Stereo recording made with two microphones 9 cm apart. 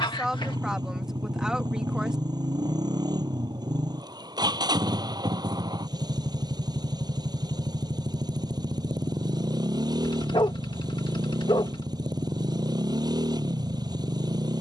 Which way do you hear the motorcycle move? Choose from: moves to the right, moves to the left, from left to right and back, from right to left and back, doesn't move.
doesn't move.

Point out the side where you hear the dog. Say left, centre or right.
left.